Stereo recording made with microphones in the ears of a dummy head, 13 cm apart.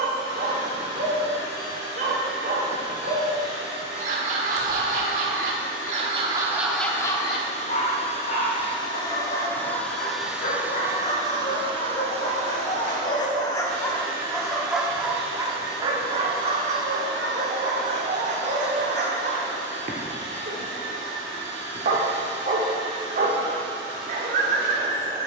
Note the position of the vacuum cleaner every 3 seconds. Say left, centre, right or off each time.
left, left, left, centre, right, right, right, right, right.